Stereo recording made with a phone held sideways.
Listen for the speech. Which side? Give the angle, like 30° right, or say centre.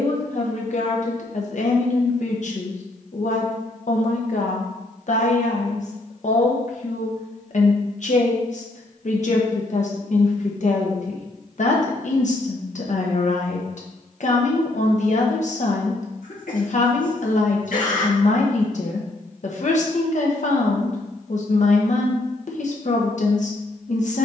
60° left.